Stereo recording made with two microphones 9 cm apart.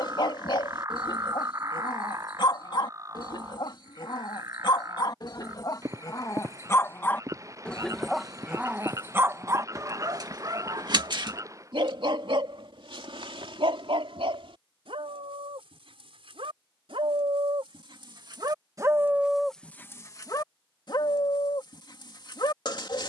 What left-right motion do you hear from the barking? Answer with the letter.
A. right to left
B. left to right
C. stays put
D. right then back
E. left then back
D.